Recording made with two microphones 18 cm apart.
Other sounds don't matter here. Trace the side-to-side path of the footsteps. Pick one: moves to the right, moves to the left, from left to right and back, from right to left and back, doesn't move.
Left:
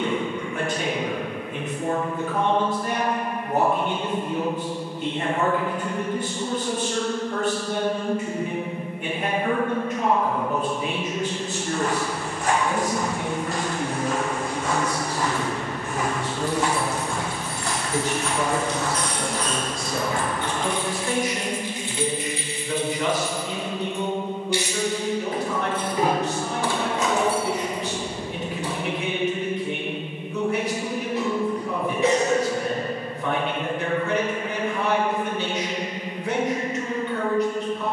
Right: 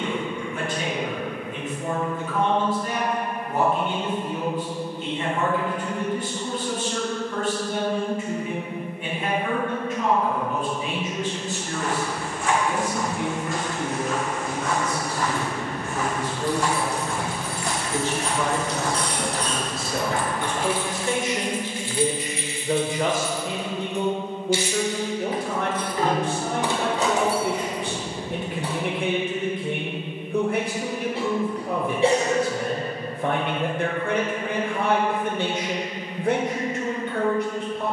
moves to the right.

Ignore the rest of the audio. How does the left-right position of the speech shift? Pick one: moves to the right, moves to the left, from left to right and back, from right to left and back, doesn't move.
moves to the right.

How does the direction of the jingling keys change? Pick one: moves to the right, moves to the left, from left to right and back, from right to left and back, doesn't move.
from right to left and back.